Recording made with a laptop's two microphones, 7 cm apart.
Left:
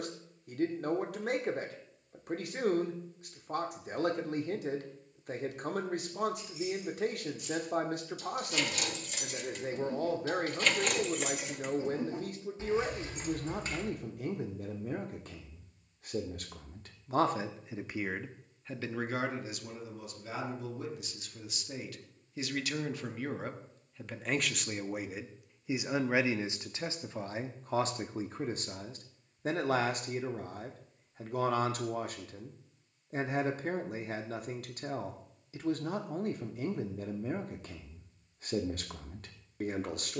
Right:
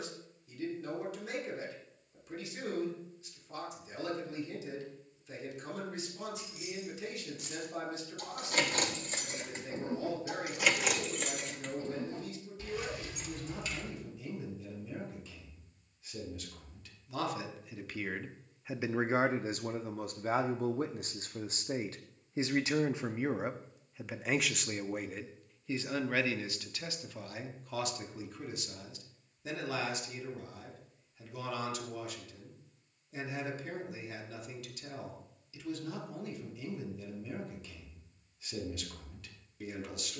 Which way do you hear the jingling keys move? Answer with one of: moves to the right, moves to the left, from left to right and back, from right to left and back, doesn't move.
moves to the left.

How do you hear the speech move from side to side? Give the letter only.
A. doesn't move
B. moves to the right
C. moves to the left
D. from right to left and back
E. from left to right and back
E.